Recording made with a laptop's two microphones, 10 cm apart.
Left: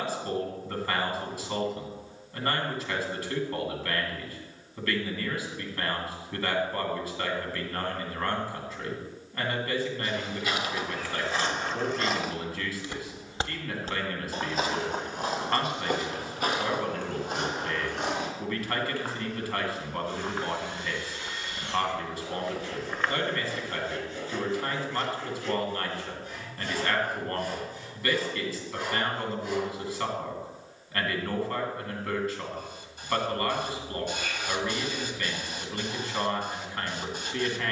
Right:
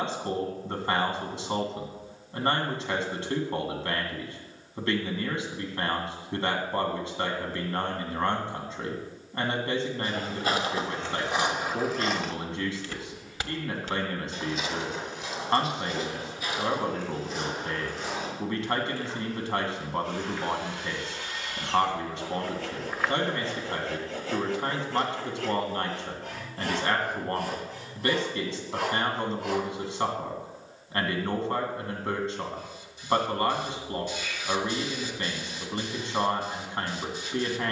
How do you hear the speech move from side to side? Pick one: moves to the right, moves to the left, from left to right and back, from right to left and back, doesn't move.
doesn't move.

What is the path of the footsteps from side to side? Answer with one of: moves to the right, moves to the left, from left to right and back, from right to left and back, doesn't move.
from right to left and back.